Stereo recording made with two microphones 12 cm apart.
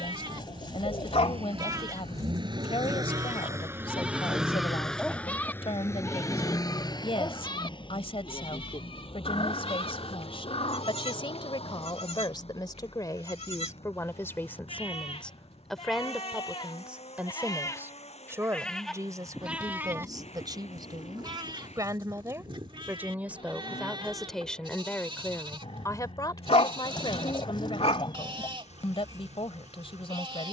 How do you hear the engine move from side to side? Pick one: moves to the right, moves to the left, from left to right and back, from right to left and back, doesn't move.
moves to the left.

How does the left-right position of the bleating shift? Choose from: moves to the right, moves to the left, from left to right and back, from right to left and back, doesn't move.
from right to left and back.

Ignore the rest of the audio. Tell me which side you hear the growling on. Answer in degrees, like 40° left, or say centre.
60° left.